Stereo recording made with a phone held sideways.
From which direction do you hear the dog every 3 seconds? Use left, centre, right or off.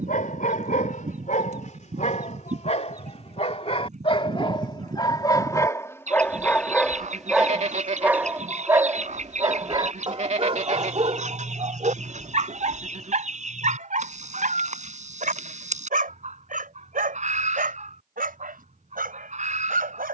left, left, centre, right, right, right, right.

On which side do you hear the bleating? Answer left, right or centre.
right.